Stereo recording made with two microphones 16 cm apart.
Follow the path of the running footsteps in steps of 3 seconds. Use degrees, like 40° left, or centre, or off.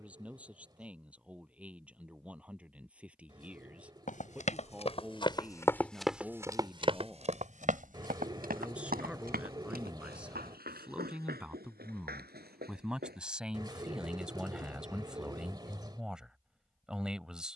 off, 30° left, 40° right, 80° right, 80° right, off.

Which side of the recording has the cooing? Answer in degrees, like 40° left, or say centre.
30° right.